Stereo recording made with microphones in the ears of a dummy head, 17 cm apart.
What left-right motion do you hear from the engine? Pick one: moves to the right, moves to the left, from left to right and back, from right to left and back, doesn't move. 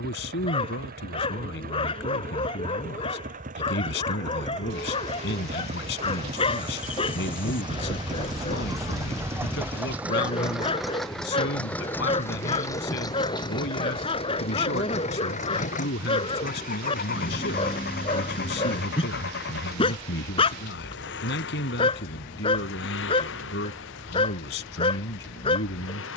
moves to the left.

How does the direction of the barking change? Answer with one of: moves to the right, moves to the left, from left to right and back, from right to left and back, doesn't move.
doesn't move.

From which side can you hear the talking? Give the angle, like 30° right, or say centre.
60° left.